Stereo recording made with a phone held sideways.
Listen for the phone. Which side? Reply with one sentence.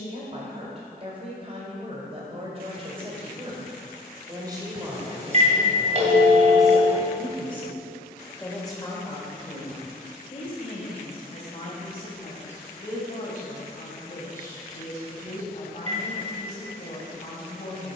You can hear the phone on the right.